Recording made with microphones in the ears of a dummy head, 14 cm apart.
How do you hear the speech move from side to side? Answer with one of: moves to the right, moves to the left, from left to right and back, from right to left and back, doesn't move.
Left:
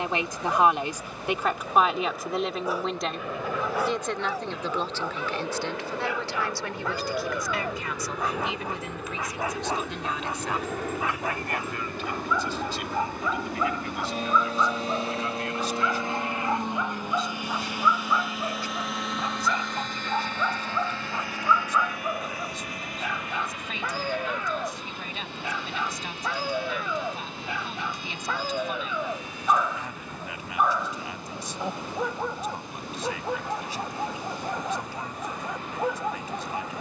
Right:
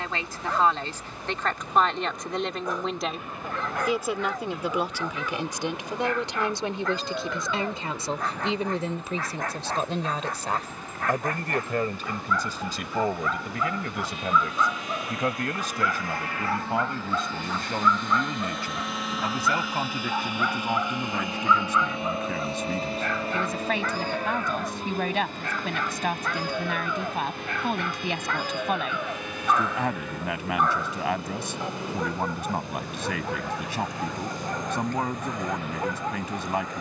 moves to the right.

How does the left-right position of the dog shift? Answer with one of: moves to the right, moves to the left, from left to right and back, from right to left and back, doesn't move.
doesn't move.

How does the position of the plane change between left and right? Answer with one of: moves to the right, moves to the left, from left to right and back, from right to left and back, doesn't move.
moves to the right.